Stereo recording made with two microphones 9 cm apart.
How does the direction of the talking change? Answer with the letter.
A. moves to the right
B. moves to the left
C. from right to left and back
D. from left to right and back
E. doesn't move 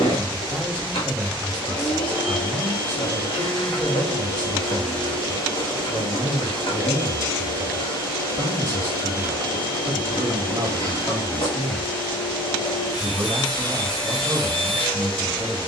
E.